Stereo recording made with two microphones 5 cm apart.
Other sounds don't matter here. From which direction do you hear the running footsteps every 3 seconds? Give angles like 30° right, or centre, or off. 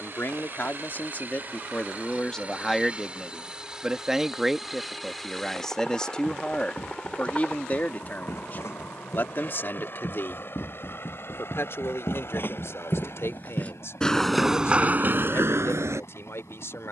off, off, 60° left, 60° left, 20° left, 60° right.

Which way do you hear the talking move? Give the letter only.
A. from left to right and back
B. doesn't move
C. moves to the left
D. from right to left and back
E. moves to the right
A.